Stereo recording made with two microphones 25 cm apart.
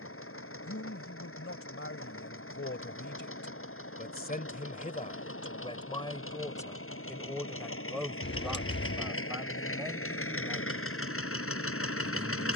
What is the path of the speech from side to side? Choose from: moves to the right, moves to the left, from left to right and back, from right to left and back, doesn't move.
moves to the right.